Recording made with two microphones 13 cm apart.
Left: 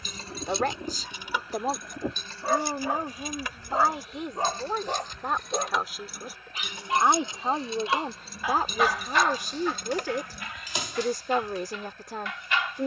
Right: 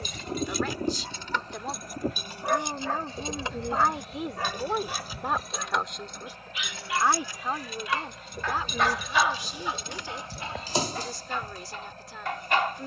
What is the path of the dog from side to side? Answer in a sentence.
In this clip you hear the dog move from right to left and back again.